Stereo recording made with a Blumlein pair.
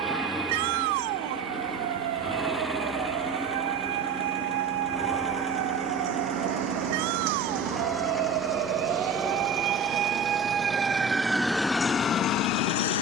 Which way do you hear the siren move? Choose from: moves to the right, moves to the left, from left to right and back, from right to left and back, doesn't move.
moves to the left.